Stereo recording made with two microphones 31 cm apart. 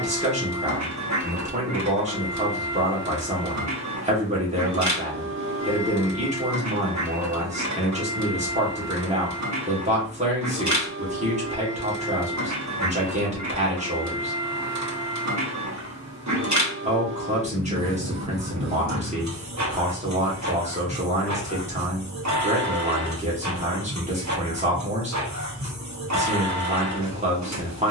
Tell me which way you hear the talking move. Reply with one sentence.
In this clip you hear the talking stay put.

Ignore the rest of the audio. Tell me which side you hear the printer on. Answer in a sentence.
You can hear the printer on the right.